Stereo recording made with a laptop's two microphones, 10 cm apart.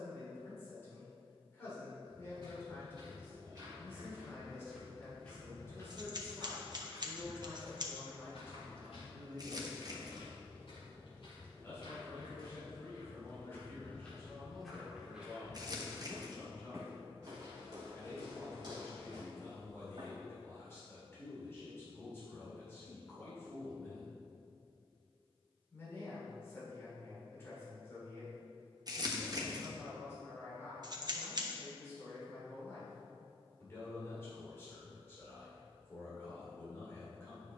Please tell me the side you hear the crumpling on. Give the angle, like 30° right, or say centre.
40° right.